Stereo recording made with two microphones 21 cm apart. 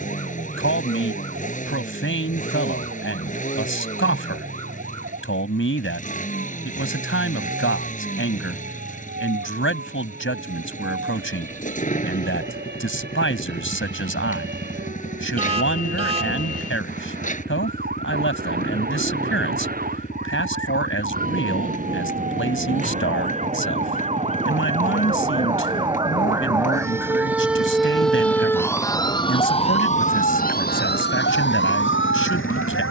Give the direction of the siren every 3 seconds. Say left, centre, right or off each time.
right, right, right, right, right, right, right, right, right, centre, left.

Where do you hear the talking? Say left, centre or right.
left.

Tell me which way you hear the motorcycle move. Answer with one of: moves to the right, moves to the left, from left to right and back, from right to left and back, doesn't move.
doesn't move.